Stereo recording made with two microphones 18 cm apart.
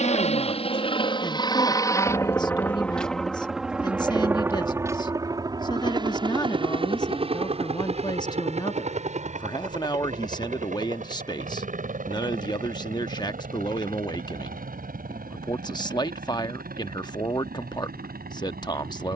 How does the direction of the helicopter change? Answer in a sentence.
You can hear the helicopter travel towards the right.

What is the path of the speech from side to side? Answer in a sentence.
In this clip you hear the speech stay in one place.